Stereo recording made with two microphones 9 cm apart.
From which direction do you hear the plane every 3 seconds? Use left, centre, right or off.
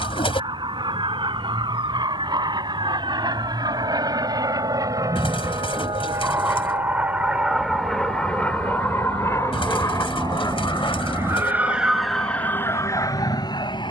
right, right, centre, left, left.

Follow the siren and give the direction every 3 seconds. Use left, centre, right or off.
right, right, right, right, left.